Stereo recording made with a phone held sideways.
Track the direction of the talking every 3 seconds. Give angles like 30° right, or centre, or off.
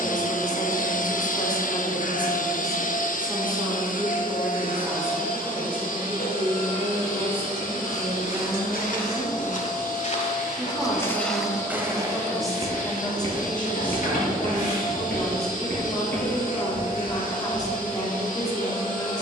20° left, 20° right, 30° right, 10° right, 10° left, 20° left, 20° left.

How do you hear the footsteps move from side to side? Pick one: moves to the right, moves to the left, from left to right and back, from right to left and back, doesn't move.
moves to the right.